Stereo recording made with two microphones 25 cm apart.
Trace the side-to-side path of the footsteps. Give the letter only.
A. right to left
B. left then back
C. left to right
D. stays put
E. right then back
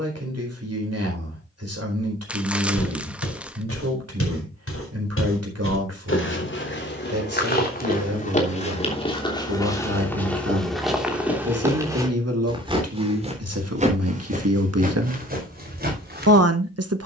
C.